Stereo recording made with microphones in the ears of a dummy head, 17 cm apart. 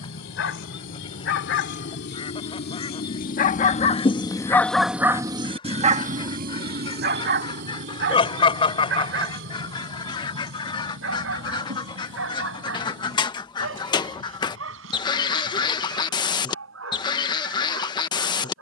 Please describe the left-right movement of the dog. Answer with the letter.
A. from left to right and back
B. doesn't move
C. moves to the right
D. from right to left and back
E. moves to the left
C.